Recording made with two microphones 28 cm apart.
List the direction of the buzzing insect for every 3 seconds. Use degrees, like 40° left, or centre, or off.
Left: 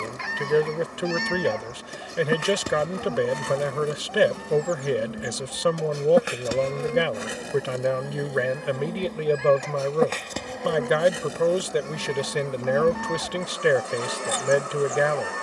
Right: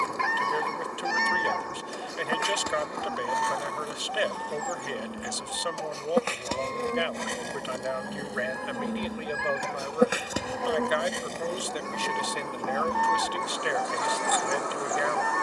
40° left, 30° left, centre, centre, 30° left.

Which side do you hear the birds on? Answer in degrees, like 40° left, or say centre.
60° right.